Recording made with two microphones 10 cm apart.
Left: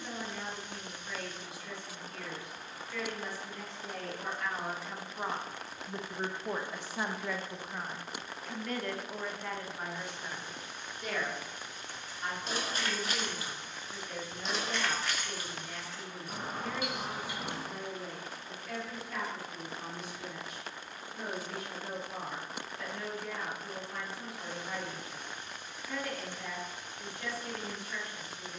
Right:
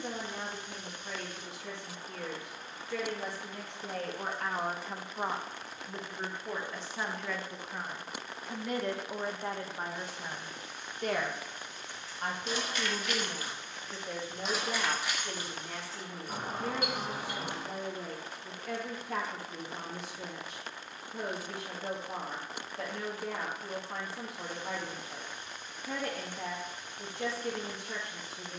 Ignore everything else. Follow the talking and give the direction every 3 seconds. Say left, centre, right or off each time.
right, right, centre, right, right, right, right, right, right, right.